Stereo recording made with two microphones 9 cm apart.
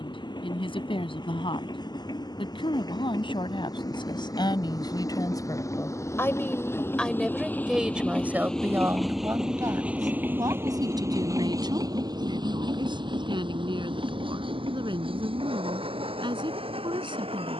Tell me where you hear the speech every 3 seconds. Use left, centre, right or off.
left, left, centre, right, right, right.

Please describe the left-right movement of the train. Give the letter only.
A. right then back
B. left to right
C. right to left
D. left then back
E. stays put
B.